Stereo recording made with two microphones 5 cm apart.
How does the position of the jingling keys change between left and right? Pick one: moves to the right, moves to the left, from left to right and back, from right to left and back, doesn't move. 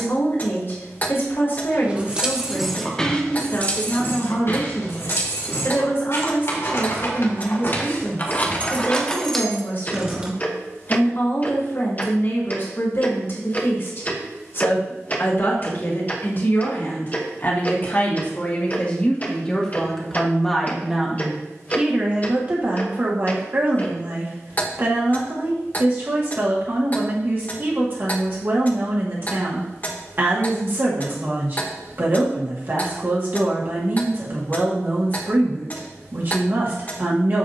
from right to left and back.